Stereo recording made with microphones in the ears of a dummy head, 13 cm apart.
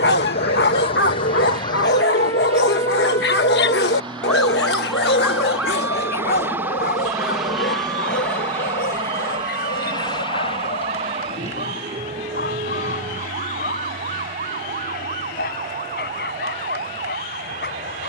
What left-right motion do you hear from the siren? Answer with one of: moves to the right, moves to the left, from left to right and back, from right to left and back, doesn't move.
moves to the right.